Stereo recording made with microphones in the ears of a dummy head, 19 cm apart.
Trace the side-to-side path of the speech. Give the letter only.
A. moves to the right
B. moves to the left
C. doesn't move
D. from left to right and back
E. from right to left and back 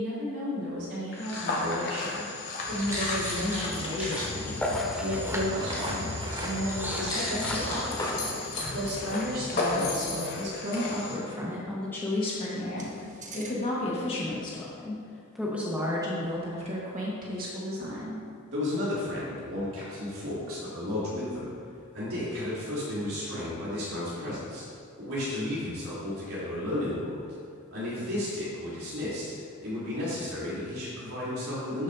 E.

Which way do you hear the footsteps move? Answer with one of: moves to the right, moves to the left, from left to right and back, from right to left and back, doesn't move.
from left to right and back.